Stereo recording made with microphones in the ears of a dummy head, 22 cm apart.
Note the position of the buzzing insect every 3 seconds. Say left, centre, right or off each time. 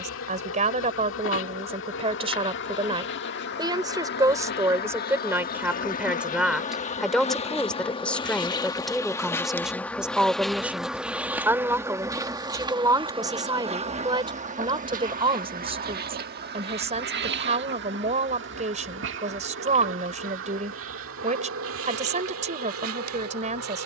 left, left, left, centre, right, right, right, right.